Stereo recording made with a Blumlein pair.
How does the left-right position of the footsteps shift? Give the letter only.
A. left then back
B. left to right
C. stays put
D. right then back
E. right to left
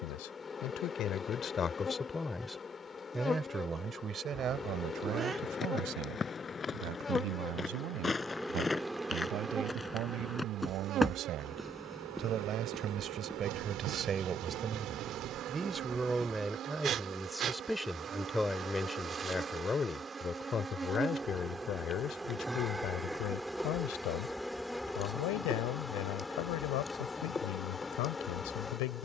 B.